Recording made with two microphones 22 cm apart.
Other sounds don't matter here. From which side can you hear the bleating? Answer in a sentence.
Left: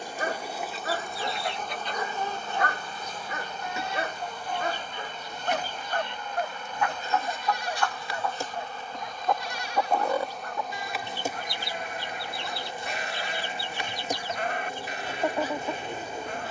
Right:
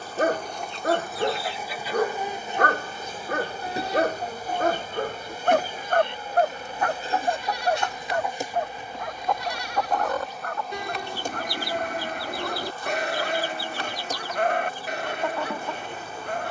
In this clip you hear the bleating on the right.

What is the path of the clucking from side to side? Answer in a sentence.
You can hear the clucking move from left to right and back again.